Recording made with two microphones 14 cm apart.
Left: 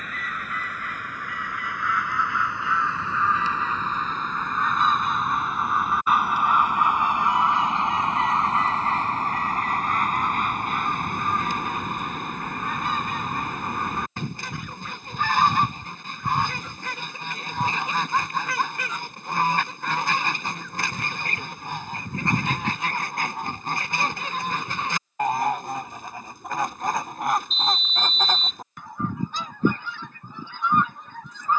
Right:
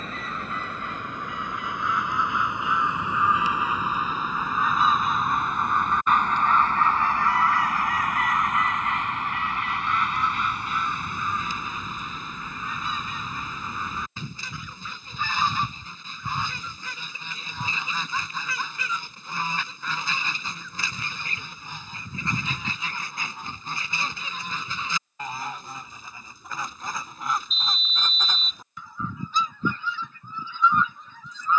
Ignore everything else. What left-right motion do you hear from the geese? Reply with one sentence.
In this clip you hear the geese move from right to left.